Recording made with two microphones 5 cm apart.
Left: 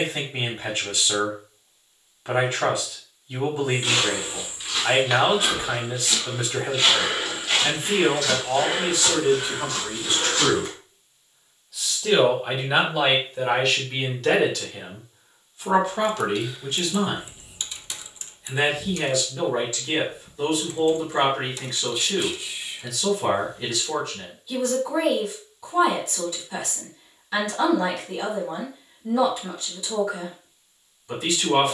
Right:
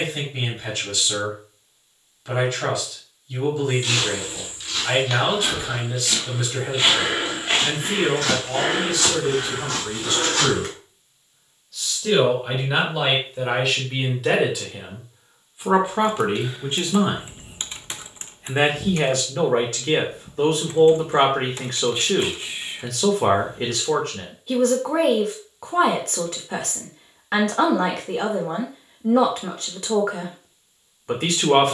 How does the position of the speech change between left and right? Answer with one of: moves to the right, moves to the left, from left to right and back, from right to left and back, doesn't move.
moves to the right.